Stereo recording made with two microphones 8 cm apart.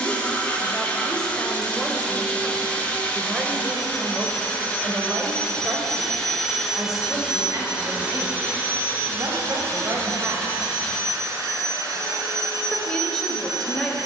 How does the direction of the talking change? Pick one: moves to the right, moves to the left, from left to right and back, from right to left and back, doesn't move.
from left to right and back.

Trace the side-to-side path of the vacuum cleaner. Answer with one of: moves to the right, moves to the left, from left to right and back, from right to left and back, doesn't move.
moves to the right.